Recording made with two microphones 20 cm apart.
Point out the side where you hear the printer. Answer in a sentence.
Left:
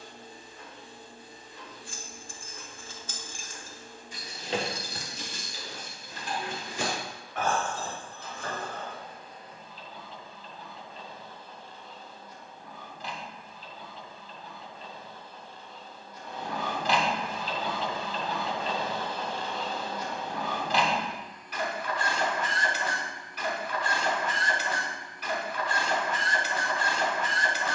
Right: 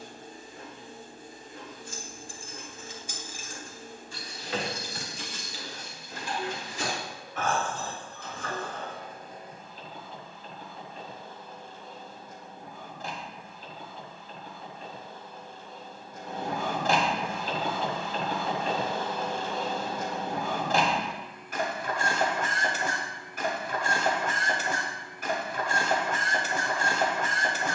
You can hear the printer on the right.